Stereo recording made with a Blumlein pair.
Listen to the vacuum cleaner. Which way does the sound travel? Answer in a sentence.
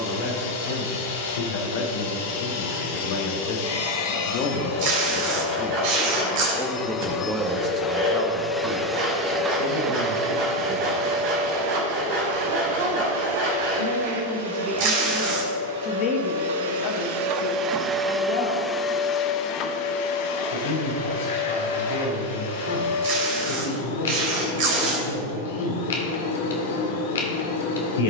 You can hear the vacuum cleaner go right and come back.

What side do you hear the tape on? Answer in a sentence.
In this clip you hear the tape on the right.